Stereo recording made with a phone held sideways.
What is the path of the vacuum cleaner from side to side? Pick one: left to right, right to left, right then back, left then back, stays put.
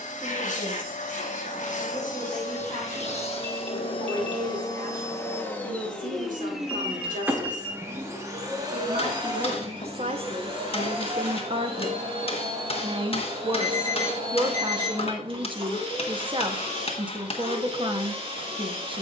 left to right.